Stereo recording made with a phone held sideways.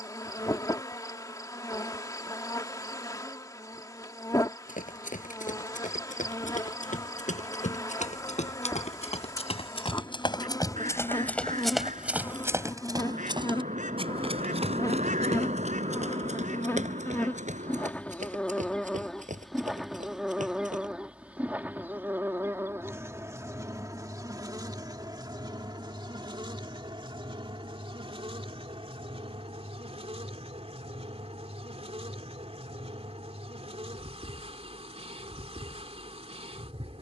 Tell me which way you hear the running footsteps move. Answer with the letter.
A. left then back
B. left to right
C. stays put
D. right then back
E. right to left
B.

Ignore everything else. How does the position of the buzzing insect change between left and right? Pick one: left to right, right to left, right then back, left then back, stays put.
left to right.